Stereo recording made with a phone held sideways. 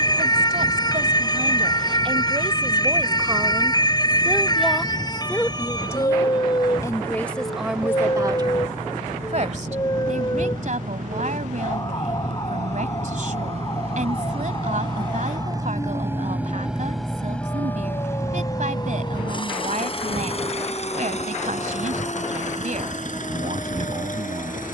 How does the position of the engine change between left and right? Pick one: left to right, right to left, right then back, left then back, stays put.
right to left.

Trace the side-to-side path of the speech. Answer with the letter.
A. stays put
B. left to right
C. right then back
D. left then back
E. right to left
D.